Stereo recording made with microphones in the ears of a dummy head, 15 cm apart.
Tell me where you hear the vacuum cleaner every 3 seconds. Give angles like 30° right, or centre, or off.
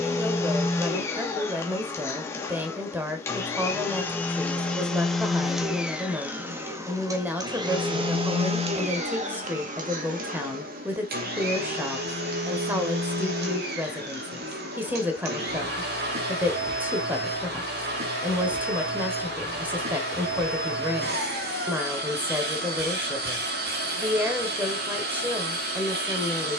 20° left, 10° left, 20° right, 50° right, 60° right, 60° right, 60° right, 60° right, 60° right.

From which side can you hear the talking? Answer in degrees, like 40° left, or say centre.
10° right.